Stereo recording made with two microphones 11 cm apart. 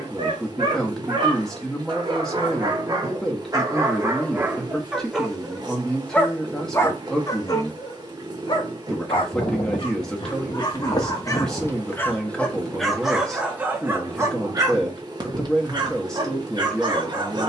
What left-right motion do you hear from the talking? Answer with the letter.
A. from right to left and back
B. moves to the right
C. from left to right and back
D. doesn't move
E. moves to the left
D.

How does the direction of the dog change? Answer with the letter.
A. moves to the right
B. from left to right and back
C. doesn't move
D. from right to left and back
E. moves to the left
D.